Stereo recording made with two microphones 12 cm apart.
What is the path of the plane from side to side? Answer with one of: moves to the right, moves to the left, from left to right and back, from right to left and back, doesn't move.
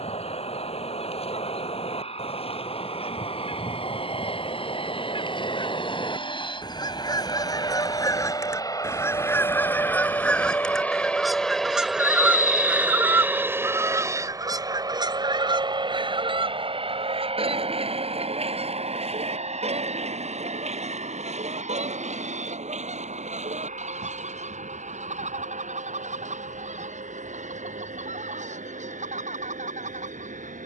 moves to the right.